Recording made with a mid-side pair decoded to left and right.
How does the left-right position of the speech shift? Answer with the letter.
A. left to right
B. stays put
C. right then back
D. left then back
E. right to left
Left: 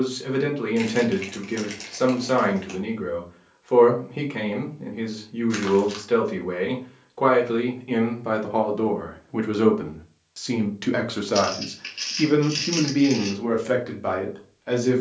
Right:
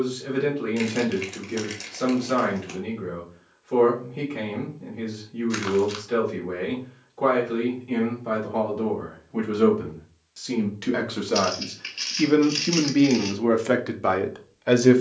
A.